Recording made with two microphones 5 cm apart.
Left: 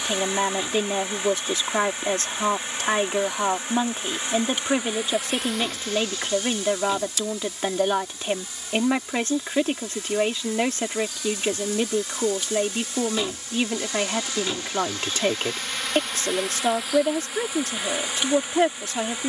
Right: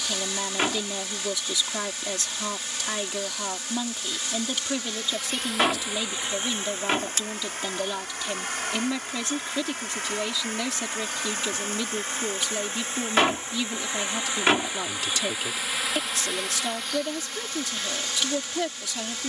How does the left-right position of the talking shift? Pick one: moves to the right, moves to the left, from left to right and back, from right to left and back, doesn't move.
doesn't move.